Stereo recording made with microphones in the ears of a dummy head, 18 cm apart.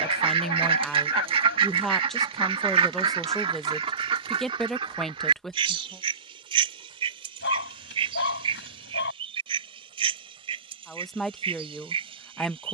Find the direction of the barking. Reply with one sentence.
In this clip you hear the barking on the left.